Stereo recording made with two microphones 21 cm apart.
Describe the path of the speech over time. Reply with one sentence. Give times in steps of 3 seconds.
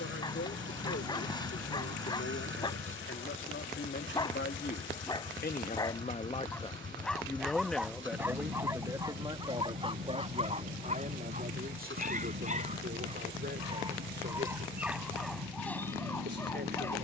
You can hear the speech on the left from 0 s, in the centre from 6 s and on the right from 9 s.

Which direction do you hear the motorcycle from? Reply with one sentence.
In this clip you hear the motorcycle on the right.